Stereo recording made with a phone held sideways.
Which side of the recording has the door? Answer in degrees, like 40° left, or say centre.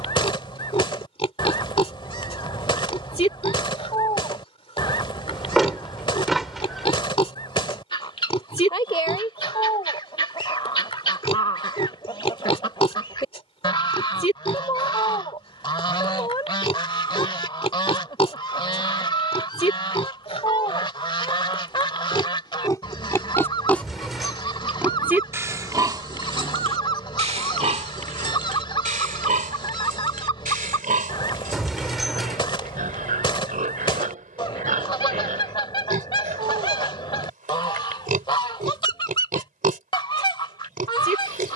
centre.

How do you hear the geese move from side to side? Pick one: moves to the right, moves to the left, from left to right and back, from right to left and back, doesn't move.
doesn't move.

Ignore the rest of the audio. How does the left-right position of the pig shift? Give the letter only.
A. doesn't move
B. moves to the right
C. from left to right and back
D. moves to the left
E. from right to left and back
B.